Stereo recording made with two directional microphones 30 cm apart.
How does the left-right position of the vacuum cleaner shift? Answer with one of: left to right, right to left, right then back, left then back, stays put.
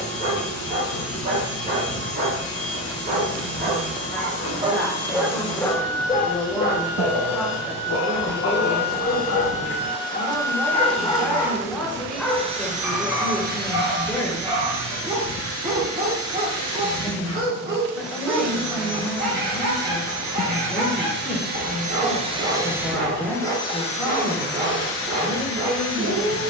right then back.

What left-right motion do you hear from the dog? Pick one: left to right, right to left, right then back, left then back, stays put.
left then back.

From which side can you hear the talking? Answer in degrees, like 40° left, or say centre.
centre.